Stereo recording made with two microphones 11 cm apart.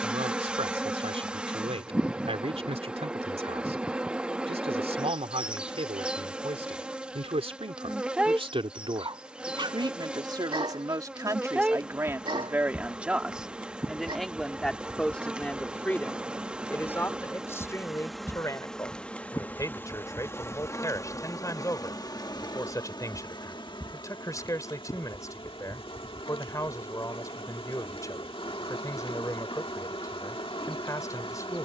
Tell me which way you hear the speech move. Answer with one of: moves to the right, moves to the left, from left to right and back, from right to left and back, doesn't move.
moves to the left.